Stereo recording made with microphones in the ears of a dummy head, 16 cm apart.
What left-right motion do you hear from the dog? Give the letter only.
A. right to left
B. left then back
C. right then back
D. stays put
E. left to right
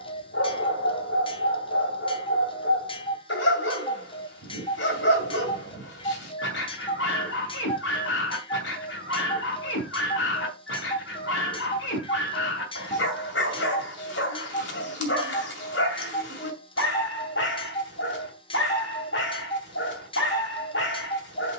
D.